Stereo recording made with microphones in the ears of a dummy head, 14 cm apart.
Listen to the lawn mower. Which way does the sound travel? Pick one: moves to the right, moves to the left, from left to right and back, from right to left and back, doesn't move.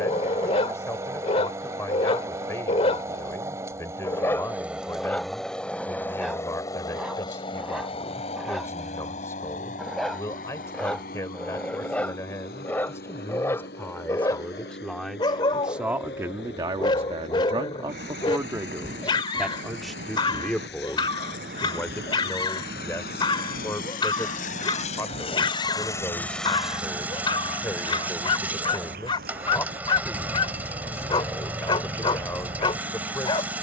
from right to left and back.